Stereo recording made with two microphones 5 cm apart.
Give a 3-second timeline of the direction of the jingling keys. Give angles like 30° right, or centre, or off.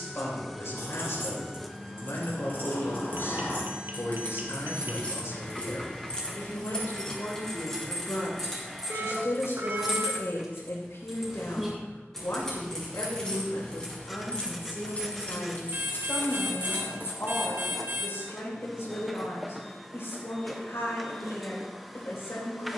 50° left, 30° left, 10° left, centre, 20° left, 40° left, off, off.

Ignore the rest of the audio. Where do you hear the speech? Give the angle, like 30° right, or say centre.
70° left.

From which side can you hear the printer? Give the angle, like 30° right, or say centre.
centre.